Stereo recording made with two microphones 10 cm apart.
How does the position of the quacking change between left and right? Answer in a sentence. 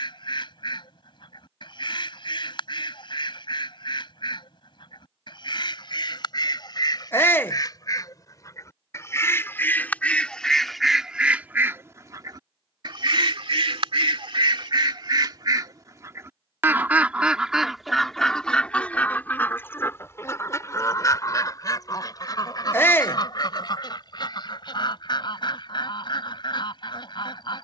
You can hear the quacking move from left to right and back again.